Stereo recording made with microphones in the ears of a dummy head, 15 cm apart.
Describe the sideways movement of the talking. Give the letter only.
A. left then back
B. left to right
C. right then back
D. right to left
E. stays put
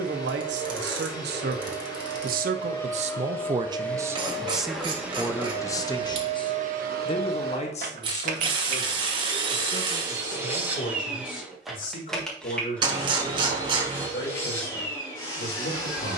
D.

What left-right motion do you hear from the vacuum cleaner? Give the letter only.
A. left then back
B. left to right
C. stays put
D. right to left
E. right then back
E.